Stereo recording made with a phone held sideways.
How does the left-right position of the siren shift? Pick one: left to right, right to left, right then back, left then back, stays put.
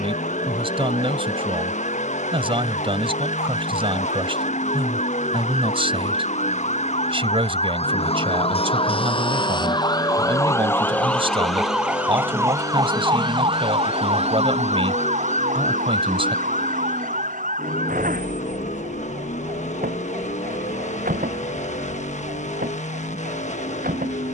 left to right.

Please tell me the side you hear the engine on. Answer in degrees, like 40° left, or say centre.
60° left.